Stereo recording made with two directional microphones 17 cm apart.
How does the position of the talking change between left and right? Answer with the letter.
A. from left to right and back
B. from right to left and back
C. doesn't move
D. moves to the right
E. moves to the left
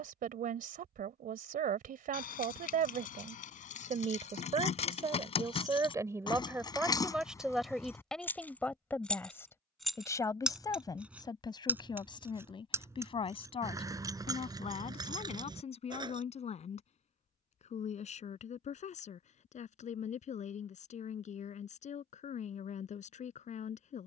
E.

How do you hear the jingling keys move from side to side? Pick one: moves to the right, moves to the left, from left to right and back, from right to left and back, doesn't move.
moves to the right.